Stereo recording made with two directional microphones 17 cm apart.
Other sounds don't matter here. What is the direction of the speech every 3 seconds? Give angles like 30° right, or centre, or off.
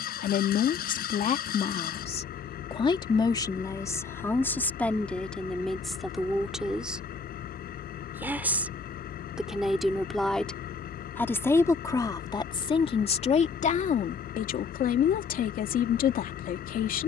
40° left, 10° left, 10° right, 10° left, 40° left, 60° left.